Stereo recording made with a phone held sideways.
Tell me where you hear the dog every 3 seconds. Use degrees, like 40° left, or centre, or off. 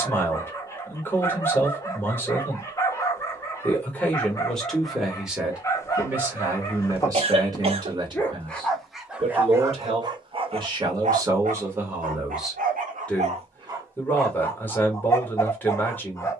20° left, 20° left, 10° left, 30° right, 40° right, 20° left.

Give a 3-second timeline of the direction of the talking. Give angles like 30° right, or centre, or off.
20° left, centre, 20° right, 30° right, 10° left, 10° left.